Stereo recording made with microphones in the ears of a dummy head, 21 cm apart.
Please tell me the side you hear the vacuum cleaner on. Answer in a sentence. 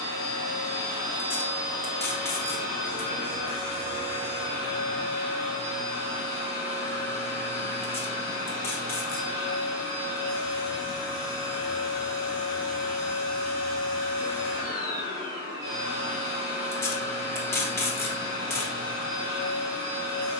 You can hear the vacuum cleaner on the right.